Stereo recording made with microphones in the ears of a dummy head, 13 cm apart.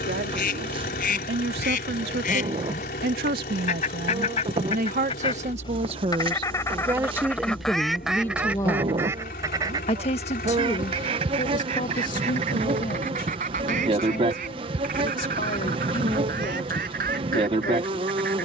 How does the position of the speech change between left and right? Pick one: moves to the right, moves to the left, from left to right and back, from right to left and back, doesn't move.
moves to the left.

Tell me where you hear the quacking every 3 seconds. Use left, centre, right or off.
left, left, centre, right, right, right.